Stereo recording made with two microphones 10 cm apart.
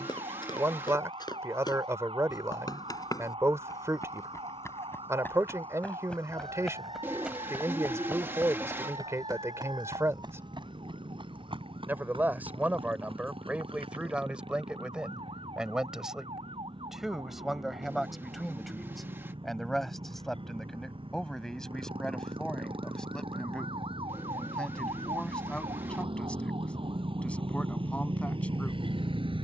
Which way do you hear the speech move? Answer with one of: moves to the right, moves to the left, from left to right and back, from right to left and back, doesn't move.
moves to the left.